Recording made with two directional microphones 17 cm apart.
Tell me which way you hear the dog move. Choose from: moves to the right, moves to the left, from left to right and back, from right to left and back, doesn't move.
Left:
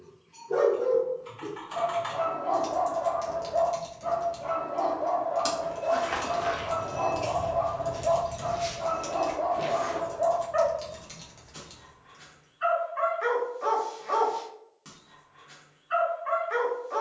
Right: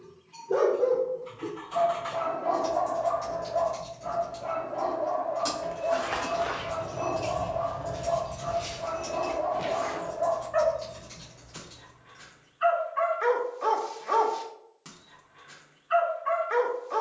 from right to left and back.